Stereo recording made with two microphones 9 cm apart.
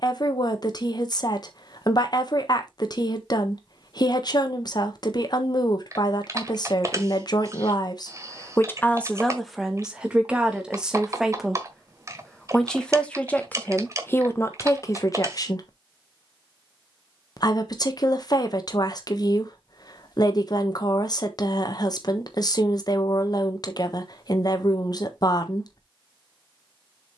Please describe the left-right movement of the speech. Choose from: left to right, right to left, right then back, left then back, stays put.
right then back.